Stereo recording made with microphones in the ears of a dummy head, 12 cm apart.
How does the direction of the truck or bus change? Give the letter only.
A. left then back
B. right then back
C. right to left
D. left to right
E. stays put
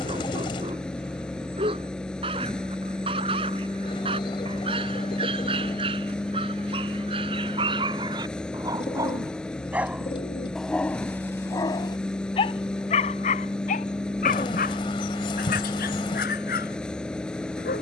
E.